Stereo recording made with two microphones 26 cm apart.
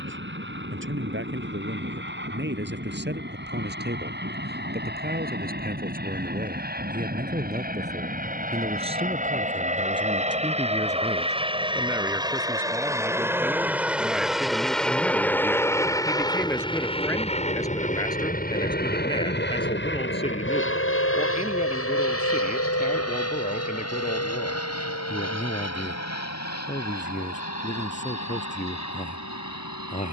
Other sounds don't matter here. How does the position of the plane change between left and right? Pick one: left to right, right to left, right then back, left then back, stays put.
right to left.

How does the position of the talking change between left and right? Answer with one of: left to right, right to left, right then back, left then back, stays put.
right to left.